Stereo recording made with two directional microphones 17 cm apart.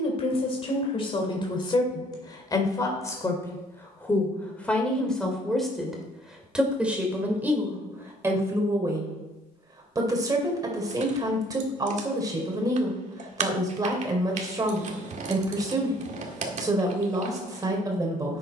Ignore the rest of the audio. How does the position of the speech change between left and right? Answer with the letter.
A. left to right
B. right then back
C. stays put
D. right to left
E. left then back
A.